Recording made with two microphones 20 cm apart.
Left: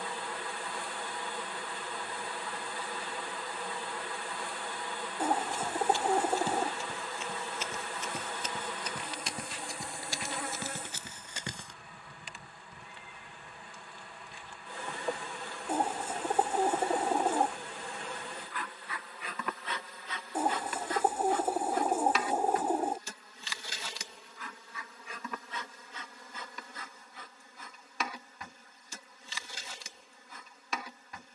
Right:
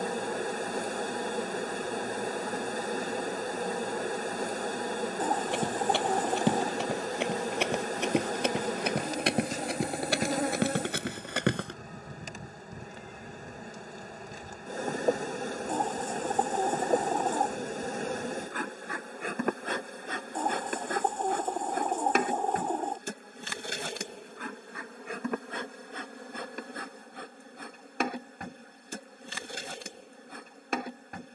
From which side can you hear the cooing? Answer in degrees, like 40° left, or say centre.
10° left.